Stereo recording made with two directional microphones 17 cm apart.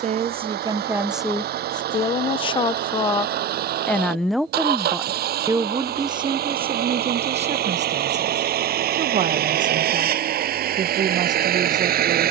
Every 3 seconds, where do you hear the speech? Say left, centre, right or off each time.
centre, centre, right, right.